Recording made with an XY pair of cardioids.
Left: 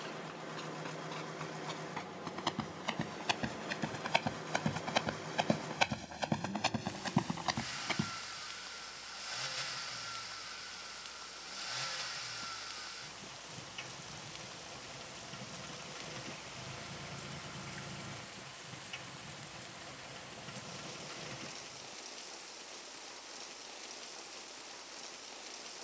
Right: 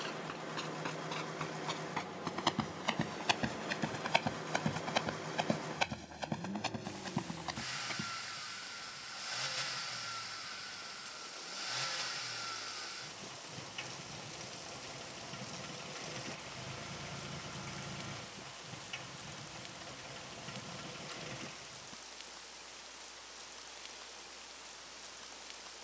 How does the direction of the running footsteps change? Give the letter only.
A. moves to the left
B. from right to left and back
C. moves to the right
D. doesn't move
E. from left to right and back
A.